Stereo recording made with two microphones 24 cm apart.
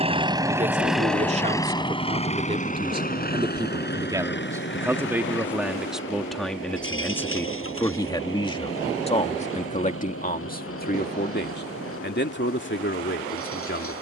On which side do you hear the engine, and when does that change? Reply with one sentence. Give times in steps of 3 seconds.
In this clip you hear the engine in the centre from 0 s and on the left from 3 s.